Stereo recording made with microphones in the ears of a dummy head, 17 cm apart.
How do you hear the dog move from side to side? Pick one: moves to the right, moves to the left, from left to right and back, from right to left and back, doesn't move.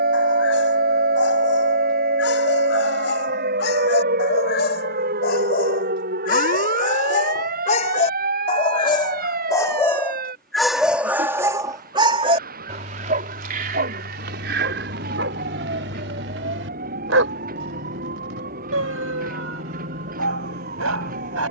moves to the right.